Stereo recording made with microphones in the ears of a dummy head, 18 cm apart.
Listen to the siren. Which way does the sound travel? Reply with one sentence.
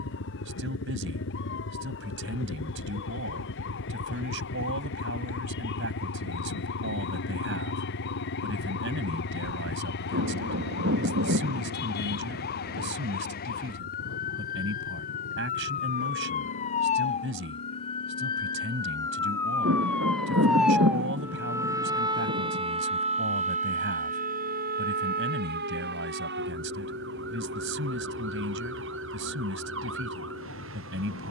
You can hear the siren travel towards the right.